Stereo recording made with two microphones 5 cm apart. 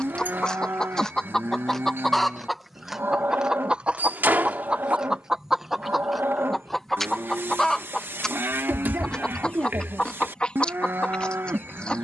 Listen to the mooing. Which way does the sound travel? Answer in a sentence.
You can hear the mooing stay in one place.